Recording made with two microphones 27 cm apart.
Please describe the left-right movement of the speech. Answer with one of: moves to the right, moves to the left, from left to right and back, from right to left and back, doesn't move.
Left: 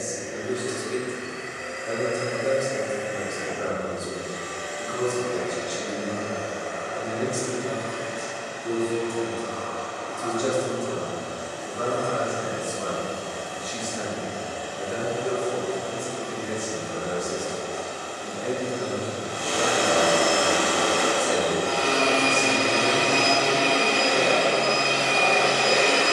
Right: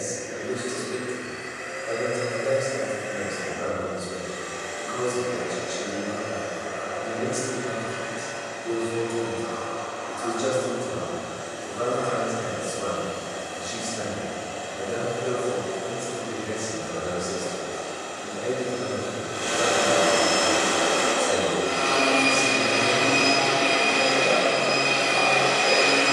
from left to right and back.